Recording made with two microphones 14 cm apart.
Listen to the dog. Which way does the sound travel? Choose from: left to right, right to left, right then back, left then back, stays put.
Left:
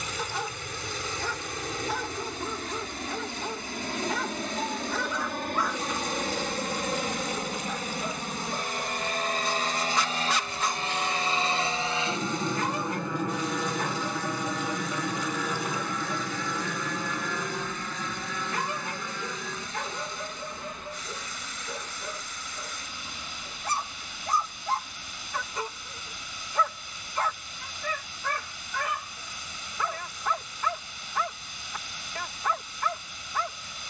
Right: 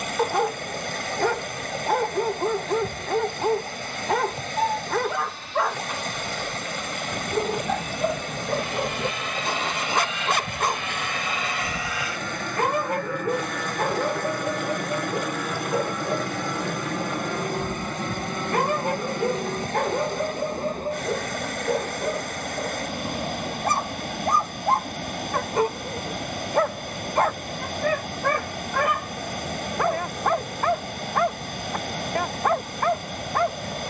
stays put.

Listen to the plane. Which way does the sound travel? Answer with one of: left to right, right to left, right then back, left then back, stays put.
left to right.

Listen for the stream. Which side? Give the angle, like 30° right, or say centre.
70° right.